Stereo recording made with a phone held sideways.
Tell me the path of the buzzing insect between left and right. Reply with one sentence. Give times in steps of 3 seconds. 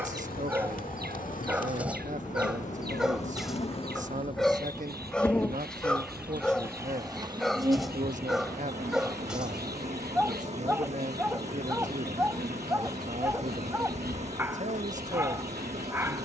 In this clip you hear the buzzing insect on the left from 0 s and on the right from 6 s.